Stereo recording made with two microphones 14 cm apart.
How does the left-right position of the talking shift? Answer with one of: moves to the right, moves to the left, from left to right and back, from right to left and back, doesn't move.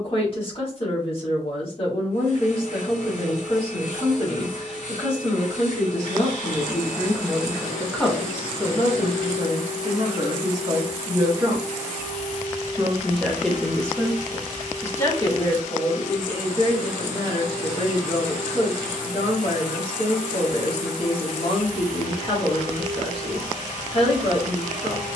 from left to right and back.